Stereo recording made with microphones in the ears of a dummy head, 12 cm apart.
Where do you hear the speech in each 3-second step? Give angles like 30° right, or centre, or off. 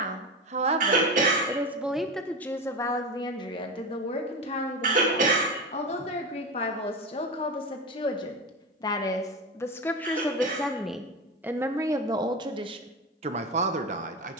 10° right, 40° left, 40° left, centre, 40° right.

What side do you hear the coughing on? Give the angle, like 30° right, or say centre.
60° right.